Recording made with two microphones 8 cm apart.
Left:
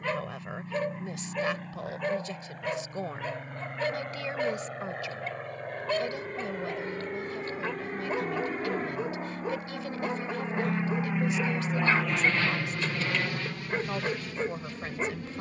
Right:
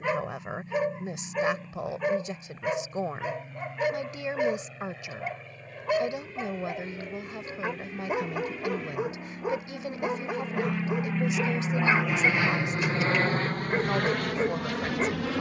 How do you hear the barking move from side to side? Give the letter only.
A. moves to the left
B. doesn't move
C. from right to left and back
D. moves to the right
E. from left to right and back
B.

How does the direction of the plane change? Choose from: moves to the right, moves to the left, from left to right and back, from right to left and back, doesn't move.
moves to the right.